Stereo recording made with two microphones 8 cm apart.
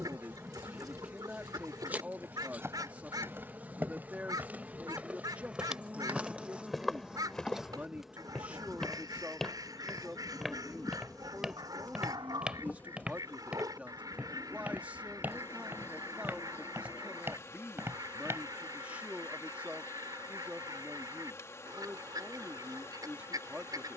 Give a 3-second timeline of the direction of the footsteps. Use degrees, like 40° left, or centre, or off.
30° right, 20° right, centre, centre, 10° right, 20° right, 30° right, off.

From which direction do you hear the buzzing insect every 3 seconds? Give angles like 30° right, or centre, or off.
20° right, 20° right, 10° right, 10° left, 20° left, 30° left, 30° left, 30° left.